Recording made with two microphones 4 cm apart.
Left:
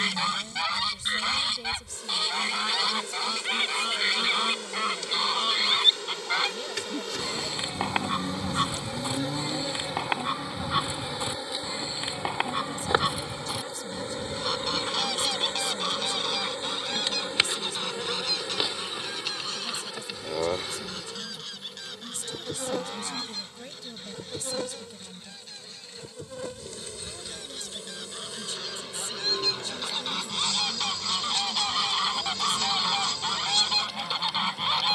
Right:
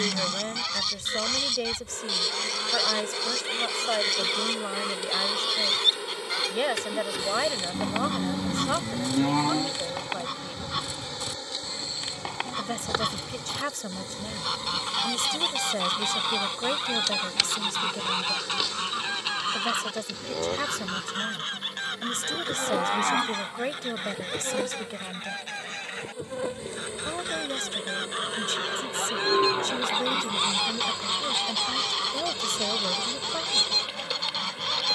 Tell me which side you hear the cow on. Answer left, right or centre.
right.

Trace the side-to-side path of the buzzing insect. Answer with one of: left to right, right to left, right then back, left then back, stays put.
left then back.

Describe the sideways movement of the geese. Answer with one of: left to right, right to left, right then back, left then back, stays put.
right then back.